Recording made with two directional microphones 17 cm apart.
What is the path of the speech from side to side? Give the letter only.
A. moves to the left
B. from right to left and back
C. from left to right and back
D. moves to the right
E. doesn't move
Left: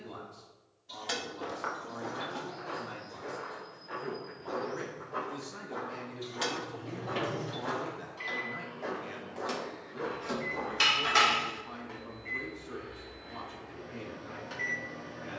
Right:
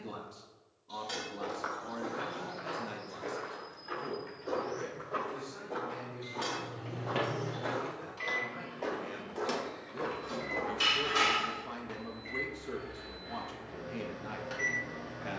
B.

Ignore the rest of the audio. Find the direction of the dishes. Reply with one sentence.
In this clip you hear the dishes on the left.